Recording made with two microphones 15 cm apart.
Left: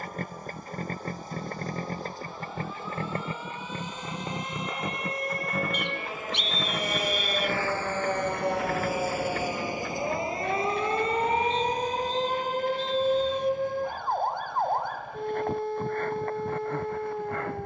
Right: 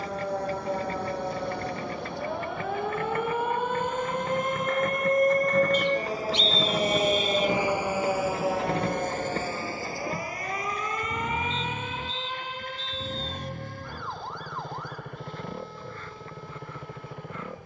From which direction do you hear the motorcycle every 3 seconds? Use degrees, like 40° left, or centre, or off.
40° left, 20° left, 10° right, 40° right, 50° right, 60° right.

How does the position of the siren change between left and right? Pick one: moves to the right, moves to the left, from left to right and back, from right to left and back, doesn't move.
moves to the left.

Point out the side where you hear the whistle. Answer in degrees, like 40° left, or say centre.
60° left.